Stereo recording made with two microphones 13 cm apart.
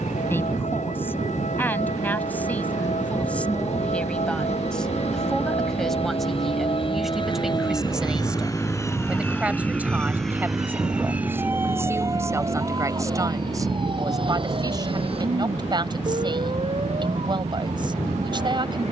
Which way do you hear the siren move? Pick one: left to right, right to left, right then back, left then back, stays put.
left to right.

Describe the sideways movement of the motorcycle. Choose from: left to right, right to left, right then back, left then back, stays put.
left to right.